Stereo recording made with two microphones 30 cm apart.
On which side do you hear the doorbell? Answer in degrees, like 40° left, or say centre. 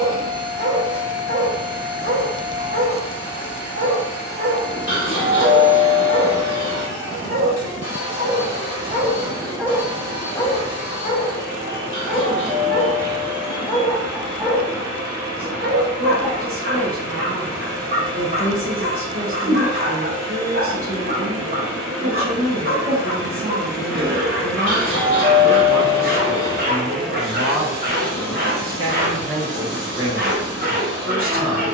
50° left.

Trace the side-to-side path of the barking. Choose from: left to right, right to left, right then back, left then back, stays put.
left then back.